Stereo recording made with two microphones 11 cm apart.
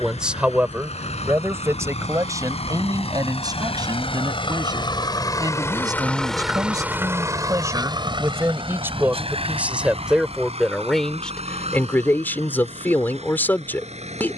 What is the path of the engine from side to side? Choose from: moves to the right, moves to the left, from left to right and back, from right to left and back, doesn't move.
moves to the right.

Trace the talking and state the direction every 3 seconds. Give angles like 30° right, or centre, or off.
20° right, 40° right, 30° right, centre, 20° left.